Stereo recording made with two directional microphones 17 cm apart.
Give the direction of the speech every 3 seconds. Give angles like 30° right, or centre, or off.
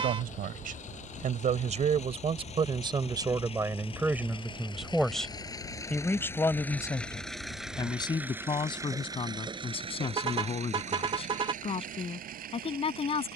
40° right, 10° right, 20° left, 30° left, 30° left.